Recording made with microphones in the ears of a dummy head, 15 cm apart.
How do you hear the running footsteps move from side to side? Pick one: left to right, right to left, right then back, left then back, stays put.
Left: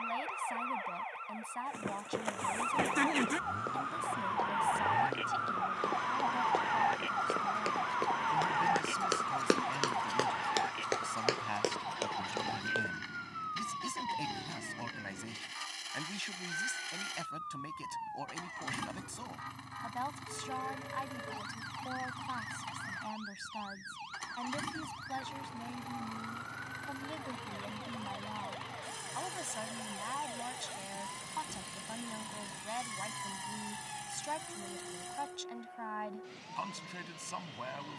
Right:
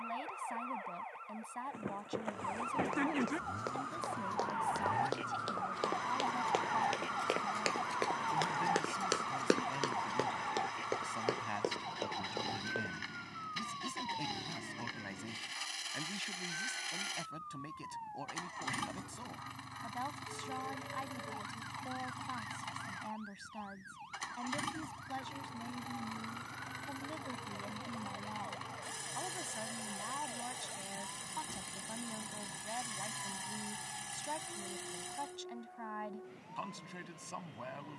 right to left.